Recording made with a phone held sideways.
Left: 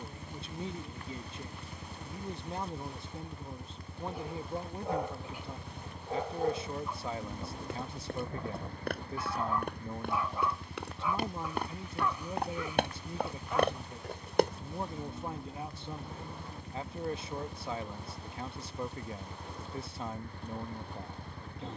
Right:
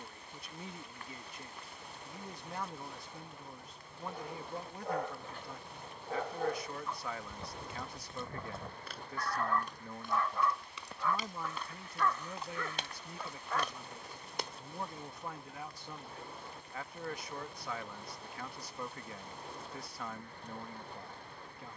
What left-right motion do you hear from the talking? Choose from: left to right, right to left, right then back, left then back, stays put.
stays put.